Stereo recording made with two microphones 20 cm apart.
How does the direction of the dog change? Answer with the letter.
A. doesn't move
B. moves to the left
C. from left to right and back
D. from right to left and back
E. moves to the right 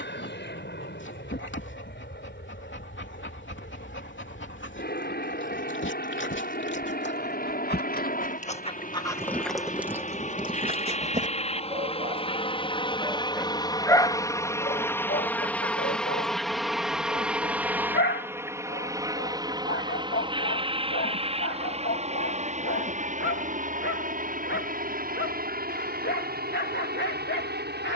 C.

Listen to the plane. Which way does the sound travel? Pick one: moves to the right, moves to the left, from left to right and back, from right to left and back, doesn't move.
moves to the right.